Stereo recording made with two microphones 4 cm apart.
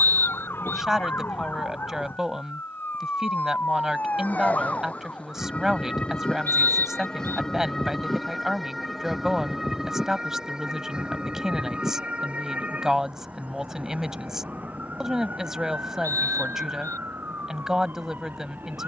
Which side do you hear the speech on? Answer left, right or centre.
centre.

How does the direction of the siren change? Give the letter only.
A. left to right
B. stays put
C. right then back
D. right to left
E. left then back
A.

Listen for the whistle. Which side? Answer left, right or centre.
left.